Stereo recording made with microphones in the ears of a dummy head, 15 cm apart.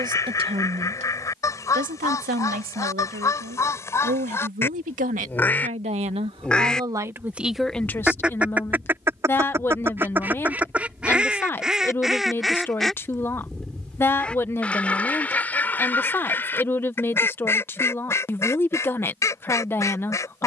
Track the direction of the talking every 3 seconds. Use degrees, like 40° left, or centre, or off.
40° right, 50° right, 10° right, 10° left, 10° left, 10° left, 10° left.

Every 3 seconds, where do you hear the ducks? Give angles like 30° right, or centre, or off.
20° left, 20° left, centre, 10° right, centre, 10° left, 20° left.